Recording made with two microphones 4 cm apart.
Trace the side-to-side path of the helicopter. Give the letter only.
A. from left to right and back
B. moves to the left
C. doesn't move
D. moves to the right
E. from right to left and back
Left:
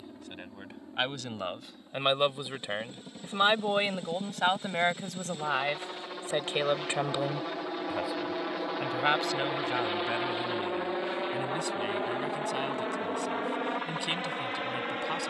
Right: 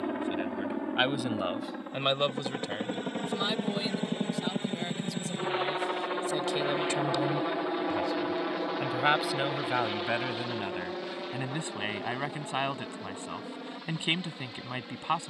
B.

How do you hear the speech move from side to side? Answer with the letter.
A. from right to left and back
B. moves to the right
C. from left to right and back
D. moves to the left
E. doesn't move
A.